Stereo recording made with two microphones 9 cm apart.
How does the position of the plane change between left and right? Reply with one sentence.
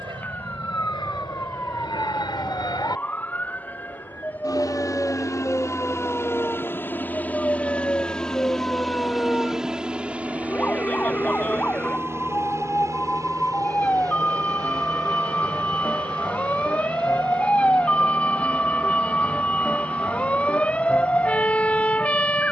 You can hear the plane travel towards the right.